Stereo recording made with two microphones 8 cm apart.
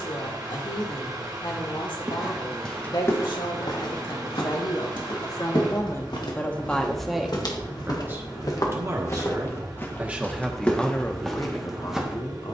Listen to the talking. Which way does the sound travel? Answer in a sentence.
In this clip you hear the talking move from left to right and back again.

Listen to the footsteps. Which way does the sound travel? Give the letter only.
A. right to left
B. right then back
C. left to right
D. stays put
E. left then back
E.